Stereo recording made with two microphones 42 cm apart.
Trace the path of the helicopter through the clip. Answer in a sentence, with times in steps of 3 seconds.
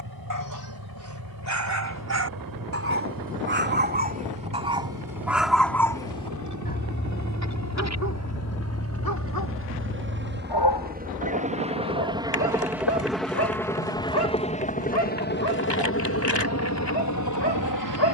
In this clip you hear the helicopter on the right from 0 s, in the centre from 12 s and on the left from 15 s.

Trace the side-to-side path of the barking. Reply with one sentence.
In this clip you hear the barking go from the right side to the left.